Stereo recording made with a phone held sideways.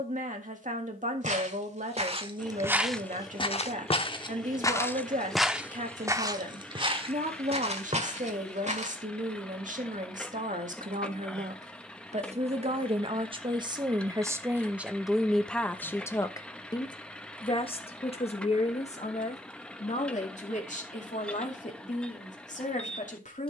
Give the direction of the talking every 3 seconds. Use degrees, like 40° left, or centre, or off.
60° right, 60° right, 60° right, 60° right, 30° right, 20° left, 50° left, 60° left.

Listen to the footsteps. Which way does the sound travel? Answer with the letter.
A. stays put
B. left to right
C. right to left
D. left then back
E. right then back
D.